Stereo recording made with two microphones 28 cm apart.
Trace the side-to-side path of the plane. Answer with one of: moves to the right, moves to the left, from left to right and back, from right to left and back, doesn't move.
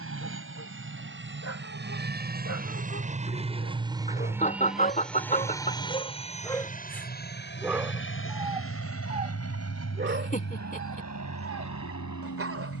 moves to the left.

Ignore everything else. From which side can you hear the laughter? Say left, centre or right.
left.